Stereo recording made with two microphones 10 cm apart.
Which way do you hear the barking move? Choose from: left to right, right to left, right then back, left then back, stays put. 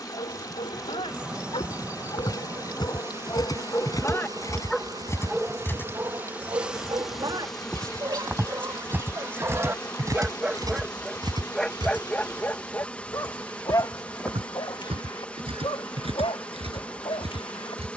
right then back.